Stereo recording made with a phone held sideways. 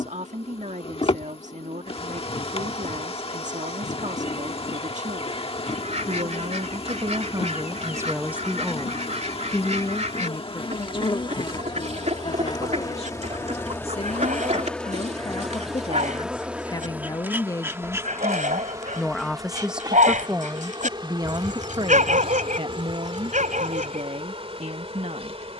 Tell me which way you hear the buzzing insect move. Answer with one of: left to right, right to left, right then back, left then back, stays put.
left to right.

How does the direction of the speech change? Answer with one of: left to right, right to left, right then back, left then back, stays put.
left then back.